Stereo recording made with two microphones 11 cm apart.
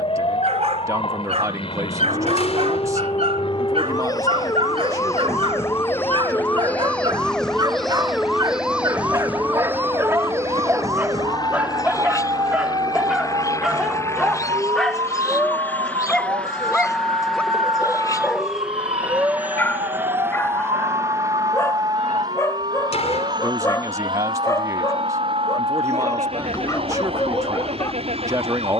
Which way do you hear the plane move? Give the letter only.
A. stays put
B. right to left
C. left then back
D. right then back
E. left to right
E.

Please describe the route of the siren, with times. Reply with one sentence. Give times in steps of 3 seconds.
In this clip you hear the siren on the left from 0 s, in the centre from 6 s and on the right from 9 s.